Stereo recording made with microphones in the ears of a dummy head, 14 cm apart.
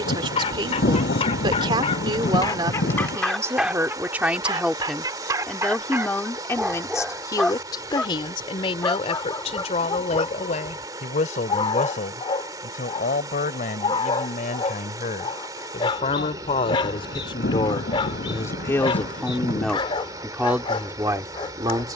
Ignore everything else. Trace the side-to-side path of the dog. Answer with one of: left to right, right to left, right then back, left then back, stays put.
right then back.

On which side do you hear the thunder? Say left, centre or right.
left.